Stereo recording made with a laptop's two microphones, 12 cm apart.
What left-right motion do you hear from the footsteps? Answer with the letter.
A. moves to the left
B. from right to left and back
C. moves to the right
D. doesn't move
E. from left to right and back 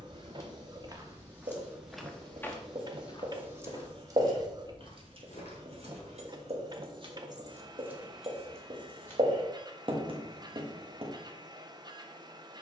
A.